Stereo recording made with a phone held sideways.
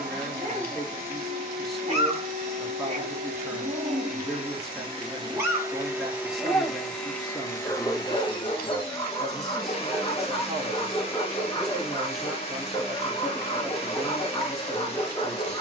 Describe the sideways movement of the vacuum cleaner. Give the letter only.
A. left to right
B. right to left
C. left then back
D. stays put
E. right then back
B.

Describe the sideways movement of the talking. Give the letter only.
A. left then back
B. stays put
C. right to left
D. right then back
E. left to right
B.